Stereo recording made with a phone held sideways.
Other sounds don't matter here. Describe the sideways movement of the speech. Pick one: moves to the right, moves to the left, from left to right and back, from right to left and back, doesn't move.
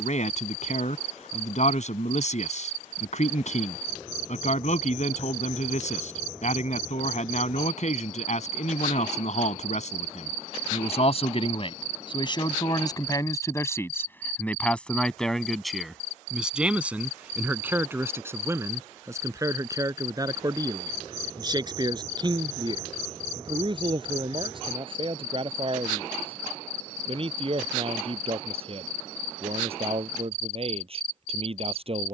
moves to the right.